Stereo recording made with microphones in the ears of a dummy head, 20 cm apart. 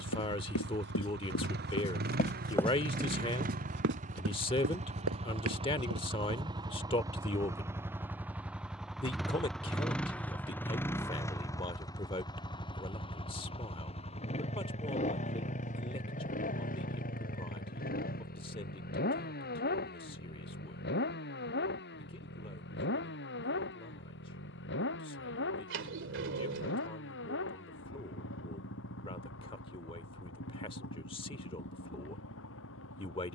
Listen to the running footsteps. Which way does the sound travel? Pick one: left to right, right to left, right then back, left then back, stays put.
left to right.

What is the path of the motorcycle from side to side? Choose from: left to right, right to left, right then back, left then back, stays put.
right to left.